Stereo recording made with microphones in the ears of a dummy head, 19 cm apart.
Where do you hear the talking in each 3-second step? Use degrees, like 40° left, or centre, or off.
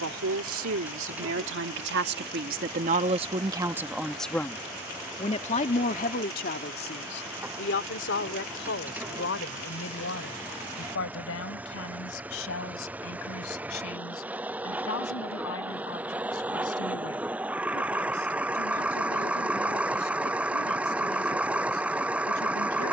60° right, 10° left, 50° left, 60° left, 70° left, 70° left, 70° left, 70° left.